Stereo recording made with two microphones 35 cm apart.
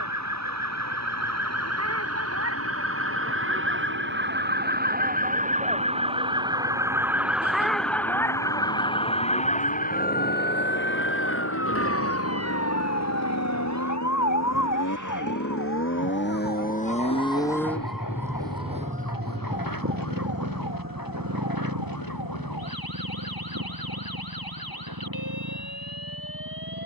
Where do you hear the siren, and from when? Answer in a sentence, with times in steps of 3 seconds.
You can hear the siren on the right from 0 s, in the centre from 6 s and on the left from 9 s.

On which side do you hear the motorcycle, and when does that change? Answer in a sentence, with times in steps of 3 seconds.
You can hear the motorcycle on the left from 0 s and on the right from 18 s.